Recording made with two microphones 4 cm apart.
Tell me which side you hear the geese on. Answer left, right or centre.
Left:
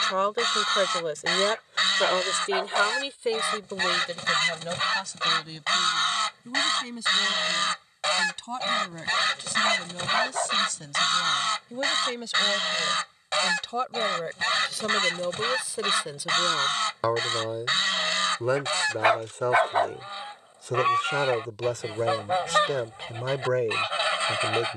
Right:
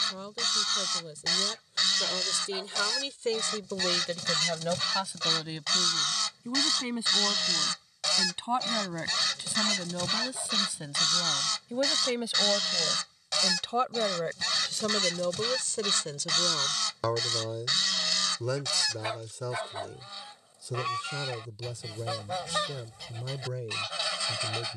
left.